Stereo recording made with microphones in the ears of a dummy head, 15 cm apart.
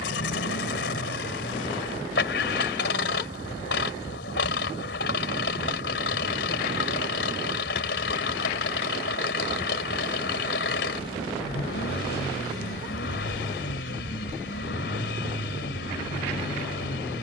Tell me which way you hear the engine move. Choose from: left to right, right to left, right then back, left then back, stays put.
stays put.